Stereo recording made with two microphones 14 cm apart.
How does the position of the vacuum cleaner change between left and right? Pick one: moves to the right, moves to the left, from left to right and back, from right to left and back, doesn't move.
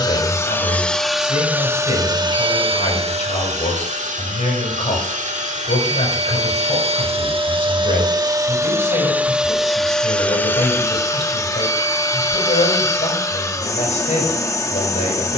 from left to right and back.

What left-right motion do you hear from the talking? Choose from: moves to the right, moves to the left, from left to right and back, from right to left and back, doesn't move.
doesn't move.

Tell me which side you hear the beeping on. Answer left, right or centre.
right.